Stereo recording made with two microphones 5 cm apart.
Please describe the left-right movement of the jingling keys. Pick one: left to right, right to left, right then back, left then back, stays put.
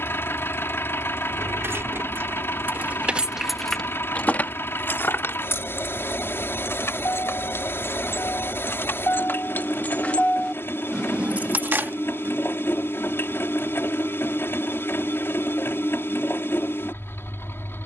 left then back.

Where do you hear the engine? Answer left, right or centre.
left.